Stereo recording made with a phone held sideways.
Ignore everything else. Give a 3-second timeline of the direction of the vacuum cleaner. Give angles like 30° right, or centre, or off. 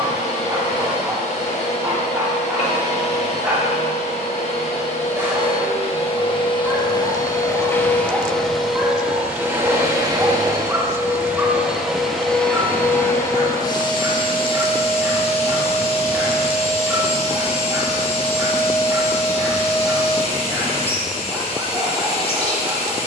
50° left, 40° left, 20° left, 20° right, 20° left, 40° left, 40° left, 40° left.